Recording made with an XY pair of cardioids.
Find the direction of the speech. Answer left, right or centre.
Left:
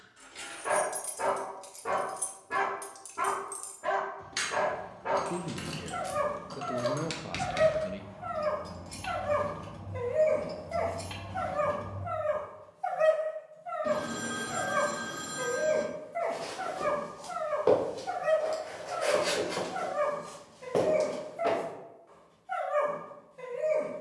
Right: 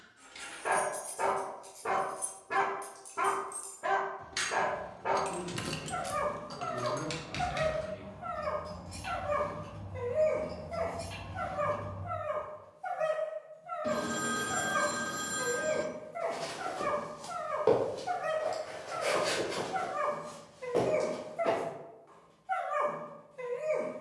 left.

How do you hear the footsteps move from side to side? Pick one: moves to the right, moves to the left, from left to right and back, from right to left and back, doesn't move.
moves to the left.